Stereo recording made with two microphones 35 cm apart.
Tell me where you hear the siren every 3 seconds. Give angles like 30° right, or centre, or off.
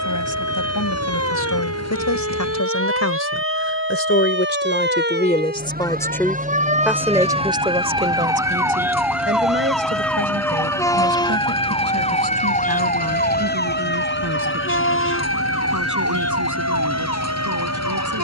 40° right, 30° right, 20° right, 10° left, 30° left, 40° left.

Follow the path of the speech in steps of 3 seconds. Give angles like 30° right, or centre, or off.
60° left, 30° left, 10° right, 40° right, 50° right, 60° right.